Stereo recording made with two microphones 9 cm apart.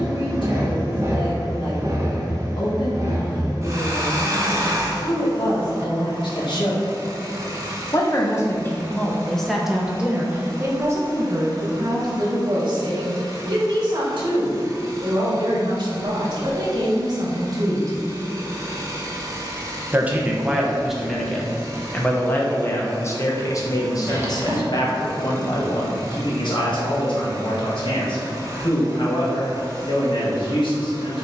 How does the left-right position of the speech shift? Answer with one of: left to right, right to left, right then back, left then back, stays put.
right then back.